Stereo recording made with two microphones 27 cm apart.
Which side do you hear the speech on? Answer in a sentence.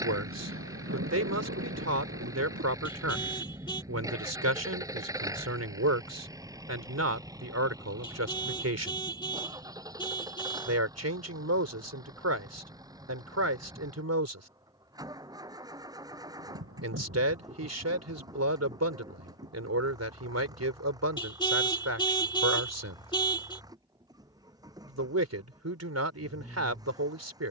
You can hear the speech on the right.